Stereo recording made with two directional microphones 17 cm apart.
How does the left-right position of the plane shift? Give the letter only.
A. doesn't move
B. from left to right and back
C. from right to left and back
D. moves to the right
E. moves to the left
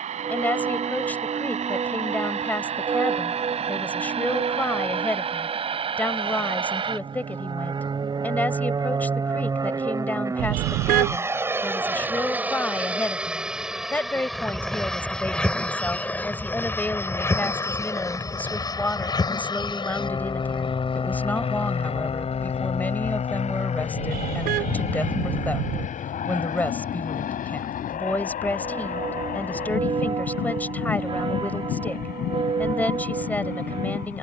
E.